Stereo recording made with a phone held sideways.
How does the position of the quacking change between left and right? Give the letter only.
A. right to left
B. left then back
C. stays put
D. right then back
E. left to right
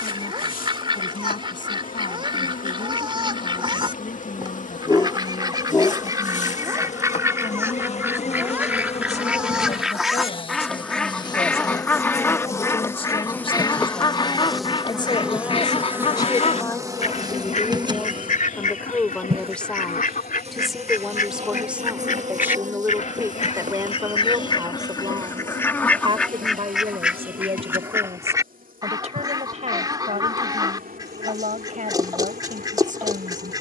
B.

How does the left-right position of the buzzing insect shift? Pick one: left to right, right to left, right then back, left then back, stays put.
left to right.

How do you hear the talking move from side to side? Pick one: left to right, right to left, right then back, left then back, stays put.
left to right.